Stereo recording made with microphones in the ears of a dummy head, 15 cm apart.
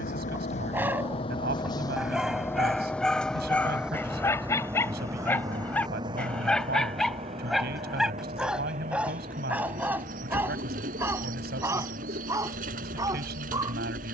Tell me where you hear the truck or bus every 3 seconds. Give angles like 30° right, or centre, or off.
30° left, 10° right, 30° right, 40° right, 50° right.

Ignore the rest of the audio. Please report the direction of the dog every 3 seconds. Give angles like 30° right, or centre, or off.
centre, 10° left, centre, 10° right, 20° right.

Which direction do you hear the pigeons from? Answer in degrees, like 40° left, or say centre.
50° right.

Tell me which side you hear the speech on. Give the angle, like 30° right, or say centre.
70° right.